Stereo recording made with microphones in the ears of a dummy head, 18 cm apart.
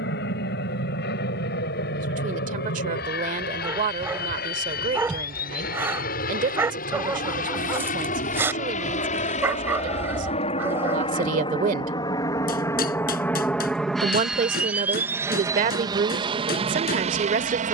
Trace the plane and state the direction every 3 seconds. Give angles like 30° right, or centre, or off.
60° left, 50° left, 50° left, 30° left, 10° left, 30° right.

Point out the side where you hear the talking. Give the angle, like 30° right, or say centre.
40° right.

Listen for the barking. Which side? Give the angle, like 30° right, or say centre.
10° right.